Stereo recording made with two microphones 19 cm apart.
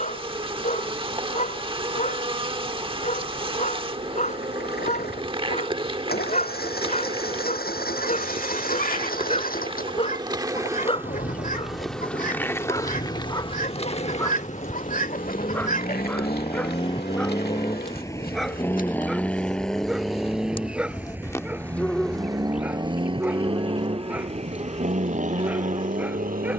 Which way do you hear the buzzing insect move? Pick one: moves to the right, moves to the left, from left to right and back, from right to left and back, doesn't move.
from right to left and back.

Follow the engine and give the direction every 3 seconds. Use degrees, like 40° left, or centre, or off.
60° left, 60° left, 60° left, 50° left, 40° left, 30° left, centre, 20° right, 40° right.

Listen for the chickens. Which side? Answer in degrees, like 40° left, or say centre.
50° left.